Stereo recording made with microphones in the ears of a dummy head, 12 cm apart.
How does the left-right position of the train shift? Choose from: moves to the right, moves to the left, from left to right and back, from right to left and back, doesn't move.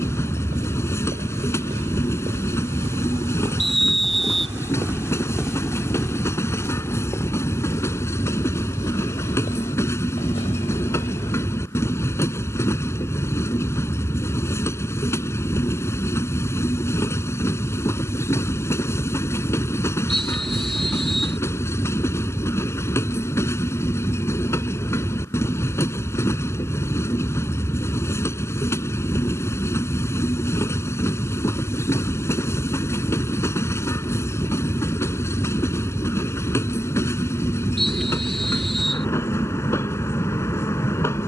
doesn't move.